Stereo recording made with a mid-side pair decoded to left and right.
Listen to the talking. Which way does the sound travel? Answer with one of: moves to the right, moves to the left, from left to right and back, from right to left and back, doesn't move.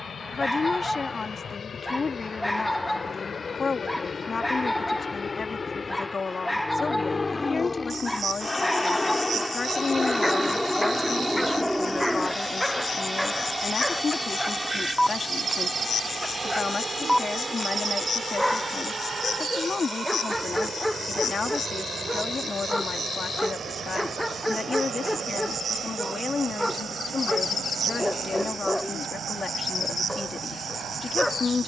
doesn't move.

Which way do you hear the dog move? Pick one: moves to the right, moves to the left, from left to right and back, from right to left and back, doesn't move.
doesn't move.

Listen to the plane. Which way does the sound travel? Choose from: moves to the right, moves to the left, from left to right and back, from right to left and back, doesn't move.
moves to the right.